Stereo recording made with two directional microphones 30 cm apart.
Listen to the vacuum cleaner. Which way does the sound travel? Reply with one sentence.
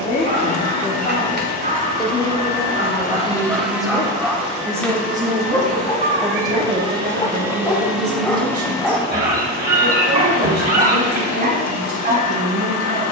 In this clip you hear the vacuum cleaner go right and come back.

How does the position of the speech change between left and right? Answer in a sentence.
You can hear the speech go from the left side to the right.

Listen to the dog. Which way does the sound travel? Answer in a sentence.
You can hear the dog move from right to left and back again.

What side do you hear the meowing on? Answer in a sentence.
You can hear the meowing on the right.